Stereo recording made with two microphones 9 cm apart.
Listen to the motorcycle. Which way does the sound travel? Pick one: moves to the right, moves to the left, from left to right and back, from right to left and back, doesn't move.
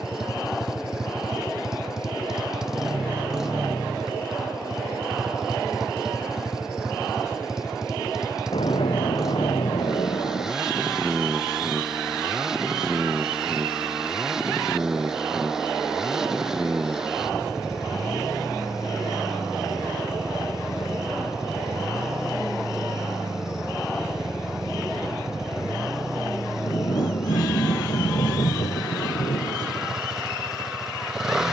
doesn't move.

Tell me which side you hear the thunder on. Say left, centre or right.
left.